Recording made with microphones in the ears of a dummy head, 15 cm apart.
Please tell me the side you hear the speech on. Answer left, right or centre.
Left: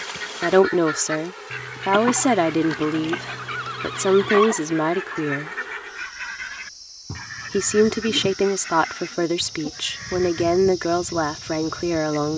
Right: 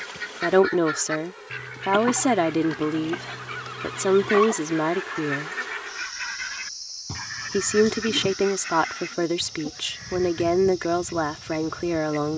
centre.